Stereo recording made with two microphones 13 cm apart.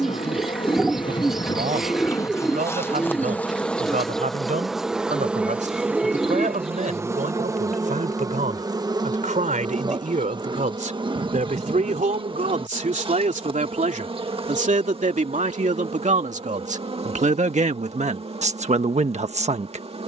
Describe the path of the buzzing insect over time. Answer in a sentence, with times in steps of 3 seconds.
In this clip you hear the buzzing insect on the left from 0 s, in the centre from 3 s and on the right from 6 s.